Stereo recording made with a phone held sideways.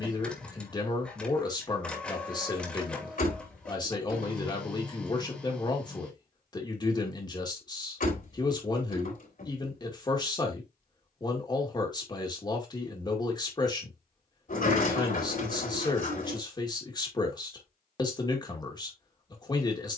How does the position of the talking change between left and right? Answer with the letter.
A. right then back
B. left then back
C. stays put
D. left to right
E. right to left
C.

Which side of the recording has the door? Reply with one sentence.
You can hear the door on the left.